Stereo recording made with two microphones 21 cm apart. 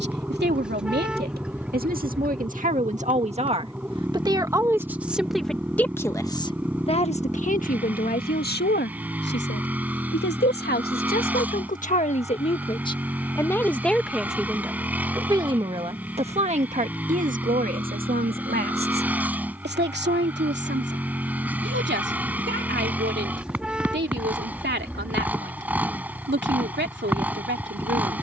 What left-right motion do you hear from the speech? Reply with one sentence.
You can hear the speech go left and come back.